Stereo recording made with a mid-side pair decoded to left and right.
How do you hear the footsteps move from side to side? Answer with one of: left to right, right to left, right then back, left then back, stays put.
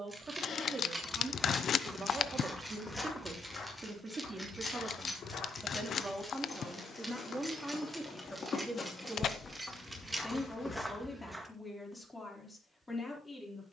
left then back.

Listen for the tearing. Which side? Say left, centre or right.
left.